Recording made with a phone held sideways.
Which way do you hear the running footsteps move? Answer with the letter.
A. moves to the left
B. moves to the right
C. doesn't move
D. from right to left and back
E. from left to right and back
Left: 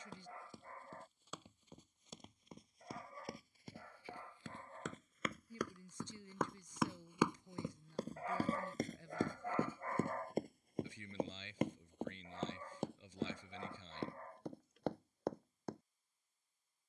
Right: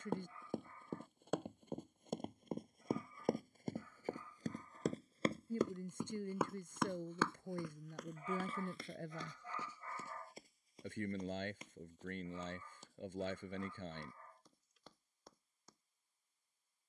A.